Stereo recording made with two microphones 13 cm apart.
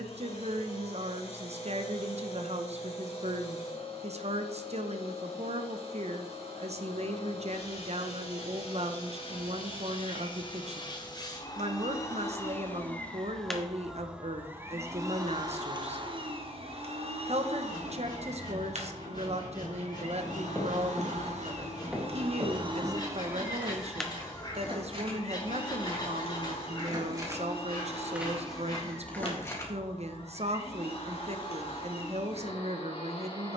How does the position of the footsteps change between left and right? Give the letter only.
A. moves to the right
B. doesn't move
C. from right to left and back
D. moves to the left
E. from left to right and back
E.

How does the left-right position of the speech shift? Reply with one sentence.
You can hear the speech stay in one place.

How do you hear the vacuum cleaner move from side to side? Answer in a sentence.
You can hear the vacuum cleaner go right and come back.